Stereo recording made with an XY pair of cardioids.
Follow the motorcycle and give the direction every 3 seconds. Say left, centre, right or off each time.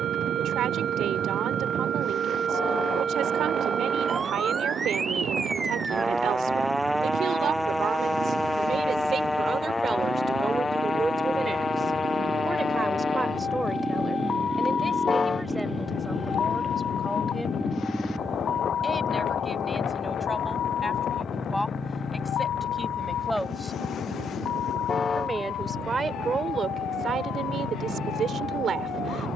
right, right, right, right, right, centre, centre, left, left, left.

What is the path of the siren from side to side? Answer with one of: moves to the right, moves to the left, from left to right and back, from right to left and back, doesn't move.
moves to the left.